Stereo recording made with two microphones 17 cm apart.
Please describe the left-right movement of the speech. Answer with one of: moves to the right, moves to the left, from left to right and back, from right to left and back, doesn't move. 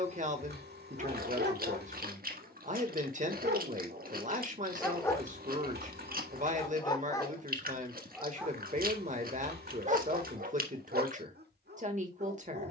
doesn't move.